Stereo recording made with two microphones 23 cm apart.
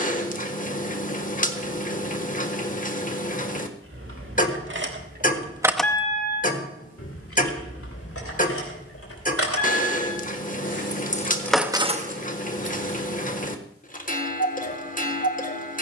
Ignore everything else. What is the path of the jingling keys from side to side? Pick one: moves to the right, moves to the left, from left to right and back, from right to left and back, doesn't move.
from right to left and back.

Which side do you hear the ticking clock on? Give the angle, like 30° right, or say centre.
40° left.